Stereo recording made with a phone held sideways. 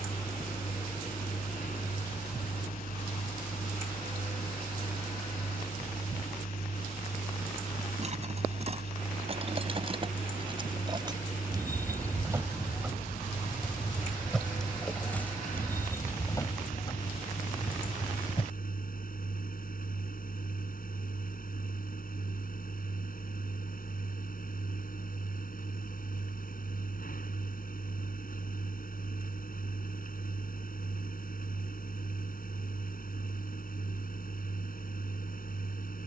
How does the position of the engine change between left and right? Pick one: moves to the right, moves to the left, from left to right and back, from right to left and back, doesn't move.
doesn't move.